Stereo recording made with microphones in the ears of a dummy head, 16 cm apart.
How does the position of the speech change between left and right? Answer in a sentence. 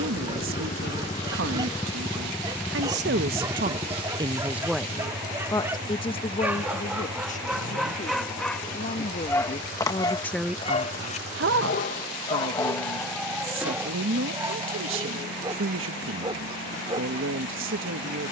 You can hear the speech move from right to left and back again.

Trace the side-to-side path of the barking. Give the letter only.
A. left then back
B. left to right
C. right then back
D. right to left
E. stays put
A.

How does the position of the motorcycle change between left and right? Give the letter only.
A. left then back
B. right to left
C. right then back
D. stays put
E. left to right
E.